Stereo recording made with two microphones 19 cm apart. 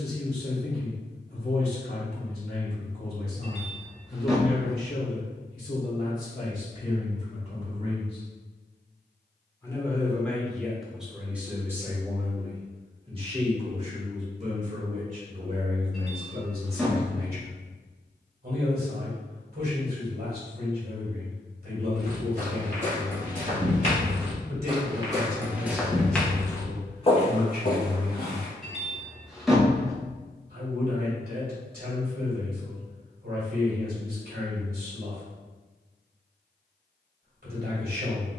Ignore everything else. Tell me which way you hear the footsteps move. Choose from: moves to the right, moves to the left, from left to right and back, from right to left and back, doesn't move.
moves to the left.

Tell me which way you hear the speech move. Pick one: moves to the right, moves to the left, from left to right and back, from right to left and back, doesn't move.
moves to the right.